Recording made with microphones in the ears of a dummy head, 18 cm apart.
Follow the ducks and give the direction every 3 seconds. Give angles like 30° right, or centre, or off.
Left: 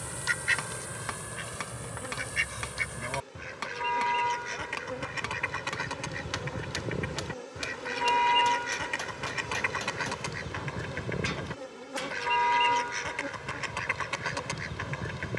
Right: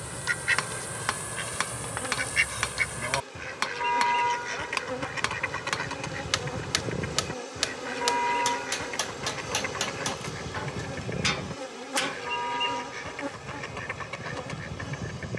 10° right, centre, 20° left, 40° left, 40° left.